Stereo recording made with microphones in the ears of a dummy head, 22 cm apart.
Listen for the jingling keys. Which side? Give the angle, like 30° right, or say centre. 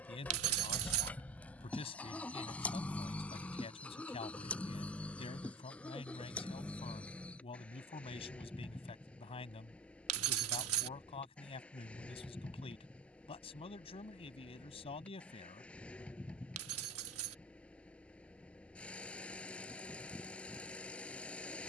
70° right.